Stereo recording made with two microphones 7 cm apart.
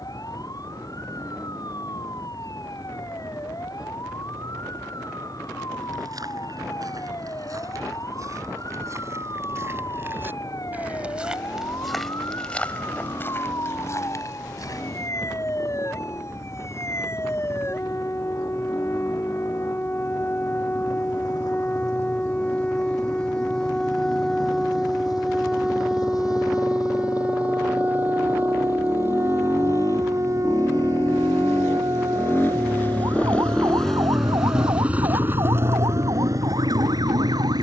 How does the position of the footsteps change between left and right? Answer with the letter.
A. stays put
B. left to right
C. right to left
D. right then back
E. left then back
C.